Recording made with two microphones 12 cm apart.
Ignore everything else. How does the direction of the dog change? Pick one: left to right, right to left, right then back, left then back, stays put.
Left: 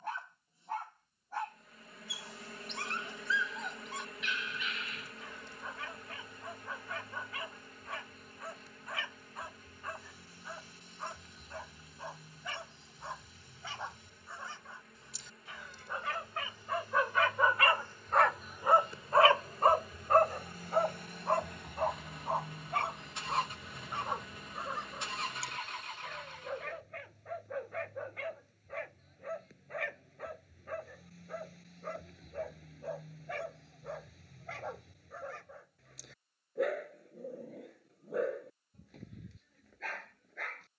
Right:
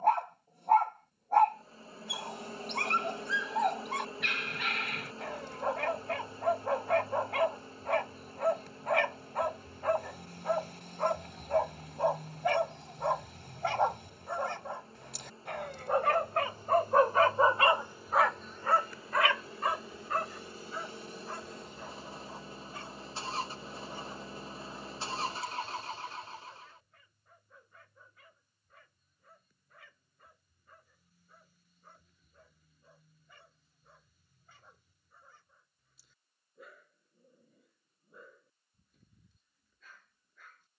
right to left.